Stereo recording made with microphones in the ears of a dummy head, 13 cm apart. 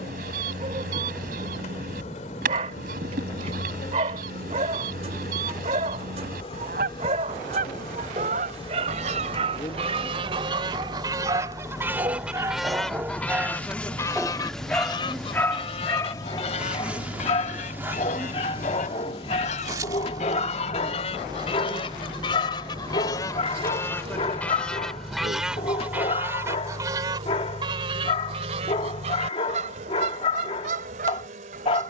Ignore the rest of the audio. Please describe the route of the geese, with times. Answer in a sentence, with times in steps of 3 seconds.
You can hear the geese on the right from 0 s, in the centre from 12 s, on the left from 15 s, in the centre from 24 s and on the right from 27 s.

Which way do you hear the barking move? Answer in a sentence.
In this clip you hear the barking move from right to left.